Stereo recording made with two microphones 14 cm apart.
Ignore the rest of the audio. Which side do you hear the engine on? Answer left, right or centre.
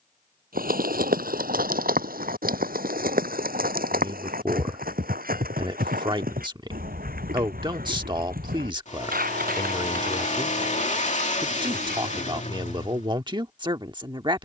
left.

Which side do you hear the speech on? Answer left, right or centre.
right.